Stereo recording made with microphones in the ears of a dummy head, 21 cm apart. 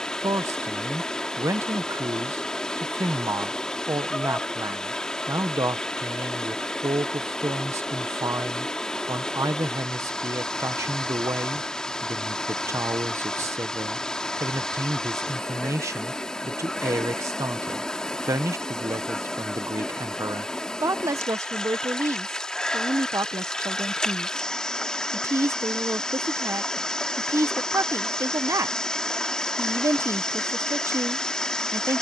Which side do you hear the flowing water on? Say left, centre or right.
centre.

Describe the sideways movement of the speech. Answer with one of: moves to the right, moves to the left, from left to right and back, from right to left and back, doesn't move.
doesn't move.